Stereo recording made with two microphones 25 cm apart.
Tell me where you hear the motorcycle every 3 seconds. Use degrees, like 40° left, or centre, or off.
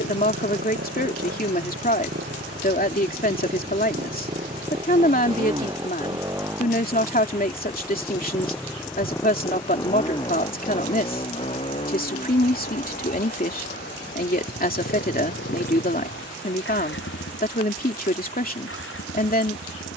40° right, 30° right, centre, 20° left, 30° left, 40° left, 50° left.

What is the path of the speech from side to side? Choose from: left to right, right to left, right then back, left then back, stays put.
stays put.